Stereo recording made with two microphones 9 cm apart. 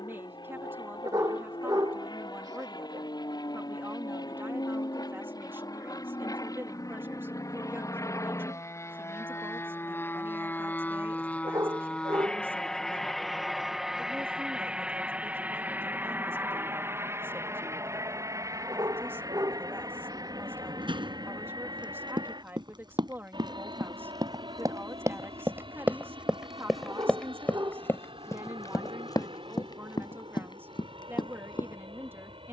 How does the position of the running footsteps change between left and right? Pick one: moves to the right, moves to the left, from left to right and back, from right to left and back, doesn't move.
moves to the left.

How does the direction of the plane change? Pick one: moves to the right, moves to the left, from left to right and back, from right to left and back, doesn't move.
moves to the right.